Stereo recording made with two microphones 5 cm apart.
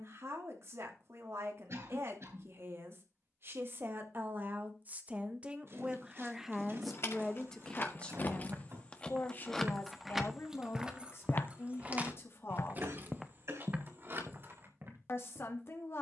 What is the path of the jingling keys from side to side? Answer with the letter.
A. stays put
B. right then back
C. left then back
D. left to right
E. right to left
D.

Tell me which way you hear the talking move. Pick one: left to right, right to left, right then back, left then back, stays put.
right to left.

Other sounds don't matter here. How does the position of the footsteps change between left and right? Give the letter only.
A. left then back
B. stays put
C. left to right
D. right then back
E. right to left
A.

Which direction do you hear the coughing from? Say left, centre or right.
right.